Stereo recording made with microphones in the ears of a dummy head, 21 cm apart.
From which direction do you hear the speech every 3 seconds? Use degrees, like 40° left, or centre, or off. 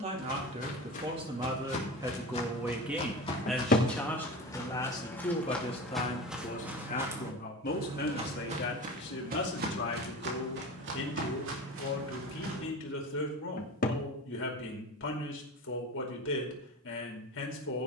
20° right, 10° left, 40° left, 50° left, 60° left, 60° left.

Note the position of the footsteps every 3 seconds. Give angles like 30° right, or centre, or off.
40° left, 20° left, 20° right, 50° right, 70° right, off.